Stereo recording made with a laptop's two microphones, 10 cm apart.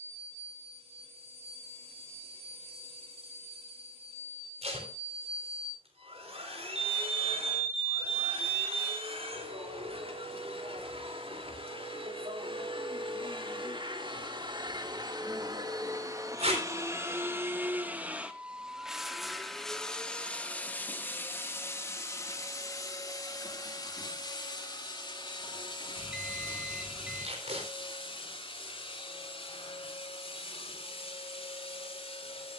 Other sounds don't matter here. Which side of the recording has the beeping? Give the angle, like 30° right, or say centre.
10° right.